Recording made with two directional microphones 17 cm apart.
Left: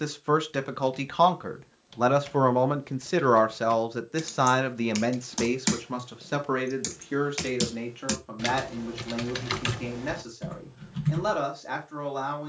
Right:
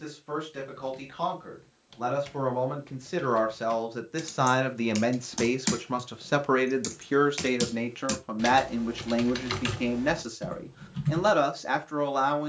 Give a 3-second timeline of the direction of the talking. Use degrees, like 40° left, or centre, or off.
60° left, 10° left, 30° right, 40° right.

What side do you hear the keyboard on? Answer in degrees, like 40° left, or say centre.
10° left.